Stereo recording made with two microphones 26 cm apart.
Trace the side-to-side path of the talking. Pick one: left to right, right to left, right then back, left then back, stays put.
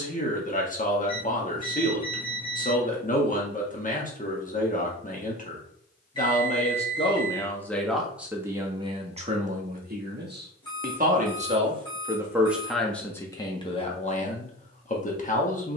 right then back.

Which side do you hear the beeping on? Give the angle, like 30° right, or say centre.
20° left.